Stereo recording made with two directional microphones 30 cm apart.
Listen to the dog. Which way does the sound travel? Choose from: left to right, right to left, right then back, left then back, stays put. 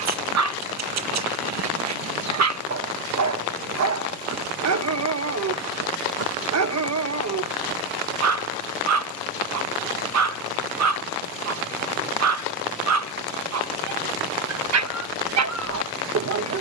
stays put.